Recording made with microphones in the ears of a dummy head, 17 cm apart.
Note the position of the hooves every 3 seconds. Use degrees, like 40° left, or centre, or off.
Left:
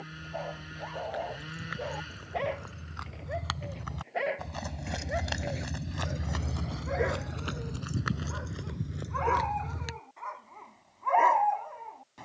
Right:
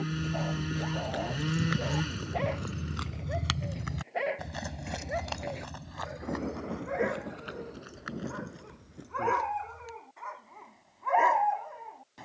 50° right, 10° right, 50° left, 70° left.